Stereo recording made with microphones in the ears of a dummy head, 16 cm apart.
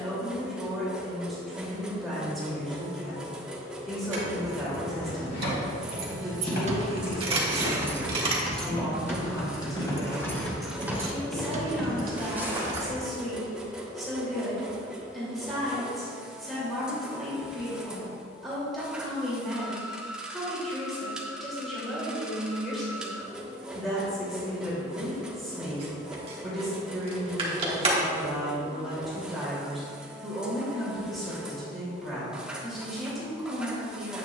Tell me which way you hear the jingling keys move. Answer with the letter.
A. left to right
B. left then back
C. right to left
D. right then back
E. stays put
B.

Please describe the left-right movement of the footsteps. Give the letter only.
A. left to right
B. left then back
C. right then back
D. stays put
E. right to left
A.